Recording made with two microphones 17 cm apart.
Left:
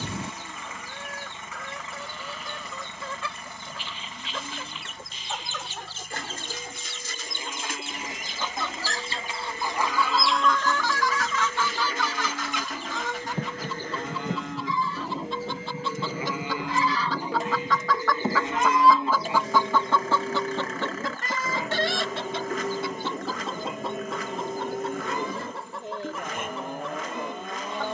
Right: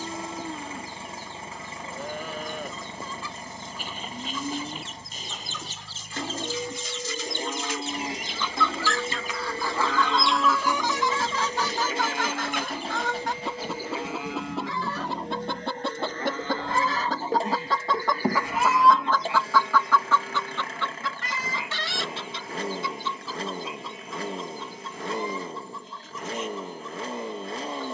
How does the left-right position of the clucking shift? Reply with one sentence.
In this clip you hear the clucking move from left to right and back again.